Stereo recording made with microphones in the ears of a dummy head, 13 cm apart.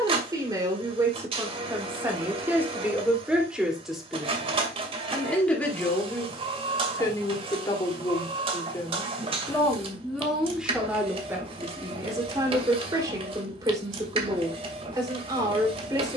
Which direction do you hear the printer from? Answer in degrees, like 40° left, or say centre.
40° right.